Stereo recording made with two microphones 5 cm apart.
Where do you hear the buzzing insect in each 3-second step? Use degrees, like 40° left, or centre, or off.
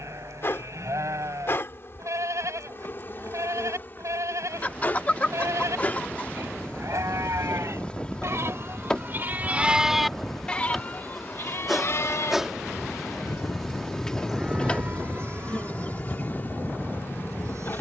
50° left, 40° left, 20° left, 10° left, 10° left, 40° left.